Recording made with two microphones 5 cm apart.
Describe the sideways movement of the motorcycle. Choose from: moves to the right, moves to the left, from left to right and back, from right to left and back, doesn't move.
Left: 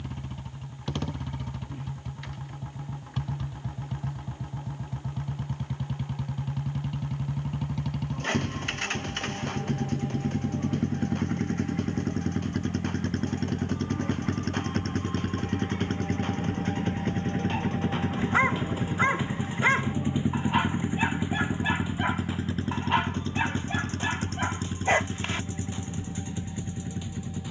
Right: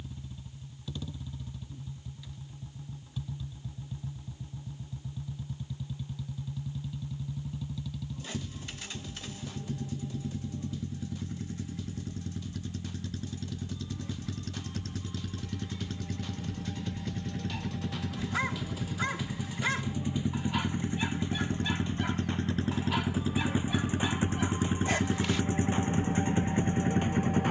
moves to the right.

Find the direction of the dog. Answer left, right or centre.
left.